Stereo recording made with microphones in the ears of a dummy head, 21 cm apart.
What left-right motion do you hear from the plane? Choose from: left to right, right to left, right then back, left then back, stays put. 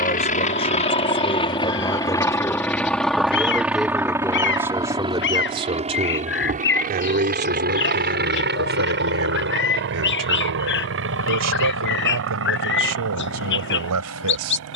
left to right.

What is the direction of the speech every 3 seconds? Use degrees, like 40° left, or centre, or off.
20° left, 10° right, 40° right, 70° right, 80° right.